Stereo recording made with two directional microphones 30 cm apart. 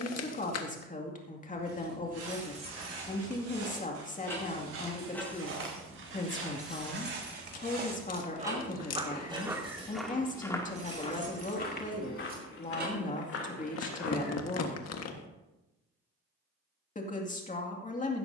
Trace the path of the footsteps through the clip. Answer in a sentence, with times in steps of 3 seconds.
In this clip you hear the footsteps on the right from 0 s, in the centre from 9 s, on the left from 12 s and not at all from 15 s.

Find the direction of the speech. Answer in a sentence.
In this clip you hear the speech on the left.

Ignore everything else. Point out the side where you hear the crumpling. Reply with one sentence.
In this clip you hear the crumpling on the left.